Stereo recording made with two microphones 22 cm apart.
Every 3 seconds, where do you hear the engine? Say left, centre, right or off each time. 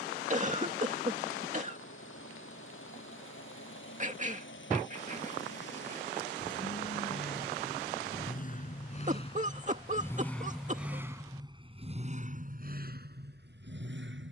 left, left, left, centre, right.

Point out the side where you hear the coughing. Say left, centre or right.
right.